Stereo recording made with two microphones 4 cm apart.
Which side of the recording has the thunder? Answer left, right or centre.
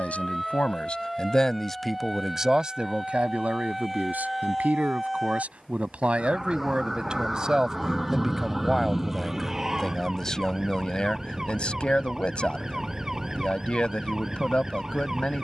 centre.